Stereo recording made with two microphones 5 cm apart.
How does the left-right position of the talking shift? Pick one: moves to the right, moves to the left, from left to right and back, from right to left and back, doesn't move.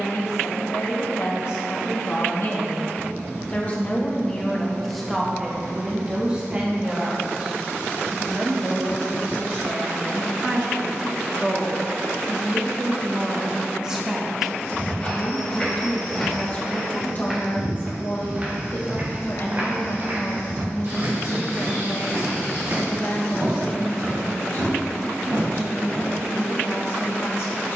from left to right and back.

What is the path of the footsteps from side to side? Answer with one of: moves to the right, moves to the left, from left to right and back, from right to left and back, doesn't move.
moves to the right.